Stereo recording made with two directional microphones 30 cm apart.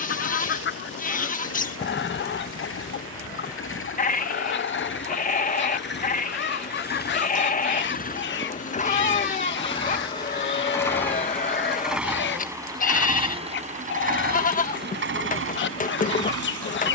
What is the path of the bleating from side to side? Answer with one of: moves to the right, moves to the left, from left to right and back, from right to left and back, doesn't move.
doesn't move.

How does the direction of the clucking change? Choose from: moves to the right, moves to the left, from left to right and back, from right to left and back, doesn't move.
doesn't move.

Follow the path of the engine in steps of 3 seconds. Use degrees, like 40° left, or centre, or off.
50° left, 40° left, 30° left, 10° left, 20° right, 50° right.